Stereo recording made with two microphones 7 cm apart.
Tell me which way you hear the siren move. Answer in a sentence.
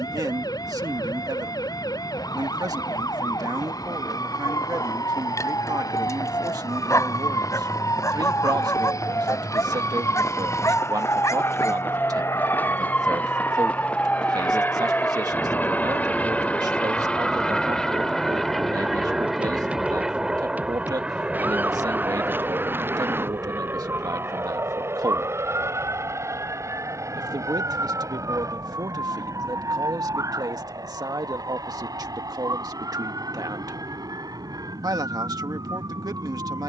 In this clip you hear the siren travel towards the right.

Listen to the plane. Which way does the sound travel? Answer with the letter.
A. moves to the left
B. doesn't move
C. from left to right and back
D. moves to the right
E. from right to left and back
D.